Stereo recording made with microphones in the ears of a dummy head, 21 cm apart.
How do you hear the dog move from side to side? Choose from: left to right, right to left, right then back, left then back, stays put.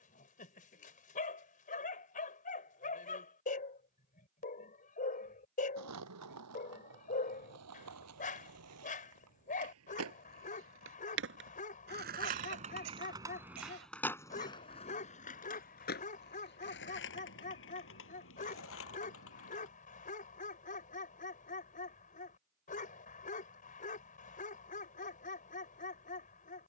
stays put.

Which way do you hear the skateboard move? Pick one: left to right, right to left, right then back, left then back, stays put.
right to left.